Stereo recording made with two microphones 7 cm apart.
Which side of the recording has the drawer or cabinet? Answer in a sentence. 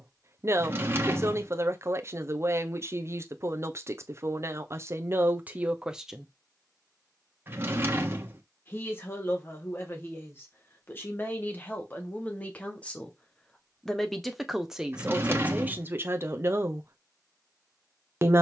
You can hear the drawer or cabinet on the right.